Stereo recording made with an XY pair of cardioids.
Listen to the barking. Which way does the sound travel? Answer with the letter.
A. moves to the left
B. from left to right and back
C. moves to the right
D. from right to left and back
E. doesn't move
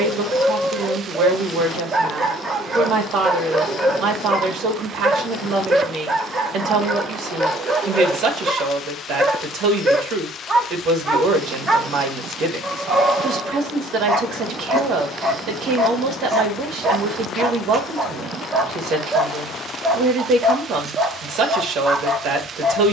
E.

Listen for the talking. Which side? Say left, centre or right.
right.